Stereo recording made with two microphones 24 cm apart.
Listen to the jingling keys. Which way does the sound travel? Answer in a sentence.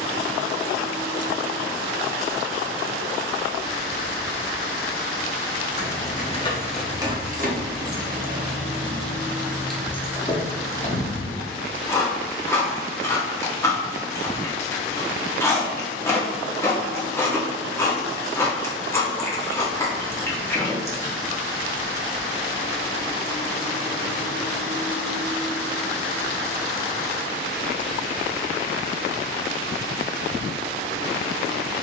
You can hear the jingling keys move from left to right and back again.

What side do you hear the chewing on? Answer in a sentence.
You can hear the chewing in the centre.